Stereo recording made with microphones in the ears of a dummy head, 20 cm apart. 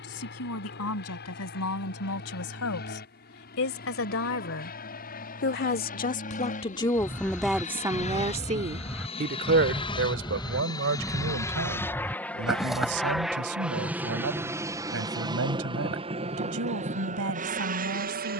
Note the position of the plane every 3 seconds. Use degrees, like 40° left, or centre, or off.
50° left, 50° left, 40° left, 20° left, centre, 30° right.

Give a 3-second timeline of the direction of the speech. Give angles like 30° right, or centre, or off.
70° left, 60° left, centre, 60° right, 70° right, 70° right.